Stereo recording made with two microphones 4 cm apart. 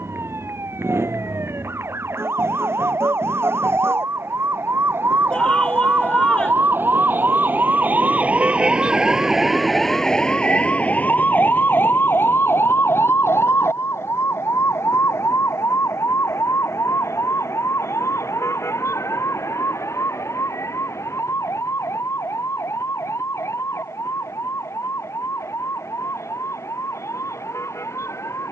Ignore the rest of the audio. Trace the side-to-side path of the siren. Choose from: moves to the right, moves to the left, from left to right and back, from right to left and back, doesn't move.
moves to the left.